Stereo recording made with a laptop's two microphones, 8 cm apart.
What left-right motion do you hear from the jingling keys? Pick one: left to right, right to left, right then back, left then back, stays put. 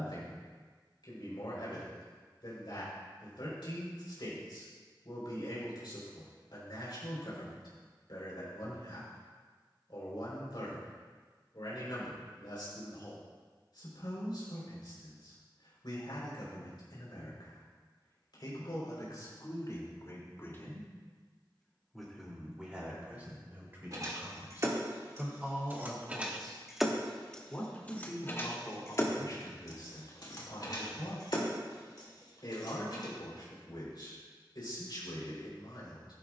right to left.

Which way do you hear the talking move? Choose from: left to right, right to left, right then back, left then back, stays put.
right then back.